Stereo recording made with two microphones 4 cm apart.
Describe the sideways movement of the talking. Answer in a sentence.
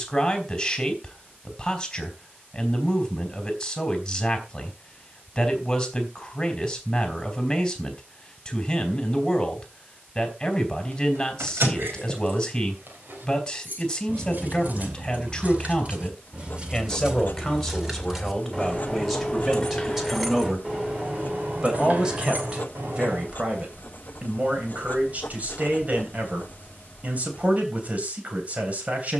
In this clip you hear the talking go from the left side to the right.